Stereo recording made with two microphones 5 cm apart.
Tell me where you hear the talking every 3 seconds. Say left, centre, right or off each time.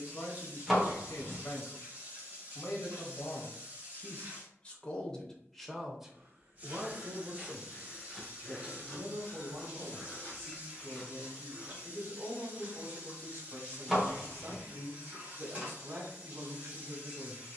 left, left, right, right, right, right.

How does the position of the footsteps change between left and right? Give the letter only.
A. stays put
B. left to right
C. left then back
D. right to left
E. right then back
C.